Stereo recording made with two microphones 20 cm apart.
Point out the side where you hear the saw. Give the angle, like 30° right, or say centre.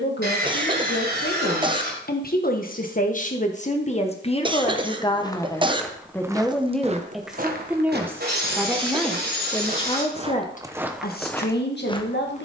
50° right.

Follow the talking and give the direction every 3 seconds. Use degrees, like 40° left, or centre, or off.
50° left, 30° left, centre, 40° left.